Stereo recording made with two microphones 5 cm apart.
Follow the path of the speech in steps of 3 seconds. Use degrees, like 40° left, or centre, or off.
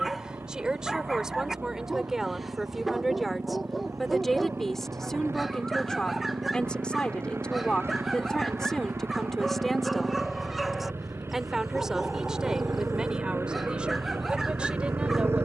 10° right, centre, 20° left, centre, 20° right.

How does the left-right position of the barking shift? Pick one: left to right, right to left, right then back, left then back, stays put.
stays put.